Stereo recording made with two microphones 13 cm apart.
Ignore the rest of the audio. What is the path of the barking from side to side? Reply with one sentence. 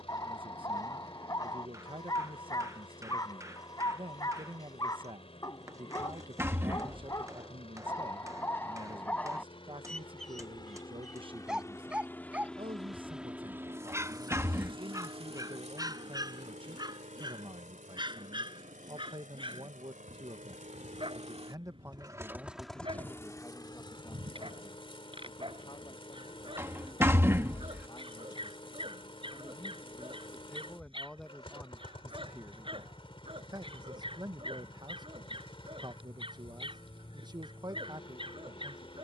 You can hear the barking move to the right.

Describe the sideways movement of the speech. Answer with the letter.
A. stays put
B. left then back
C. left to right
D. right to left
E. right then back
B.